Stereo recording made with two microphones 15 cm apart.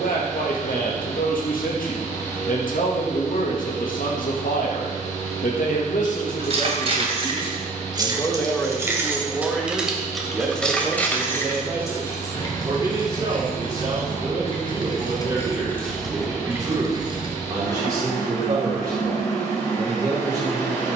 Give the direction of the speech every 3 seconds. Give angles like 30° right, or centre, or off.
70° left, 70° left, 30° left, 10° right, 20° right, 30° right, 30° right.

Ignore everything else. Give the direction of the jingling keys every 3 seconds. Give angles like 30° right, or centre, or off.
off, off, 30° right, centre, 30° left, centre, off.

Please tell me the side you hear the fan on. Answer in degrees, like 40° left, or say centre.
20° left.